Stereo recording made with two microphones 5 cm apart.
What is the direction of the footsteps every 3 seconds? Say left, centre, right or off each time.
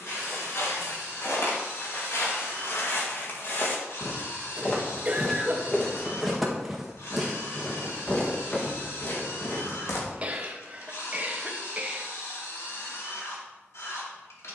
left, left, centre, left, off.